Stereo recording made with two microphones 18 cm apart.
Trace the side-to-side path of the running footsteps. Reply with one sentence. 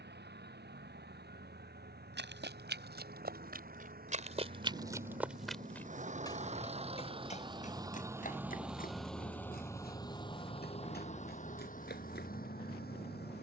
You can hear the running footsteps travel towards the left.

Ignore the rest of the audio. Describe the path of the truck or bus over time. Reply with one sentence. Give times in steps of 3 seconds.
You can hear the truck or bus on the right from 0 s and on the left from 9 s.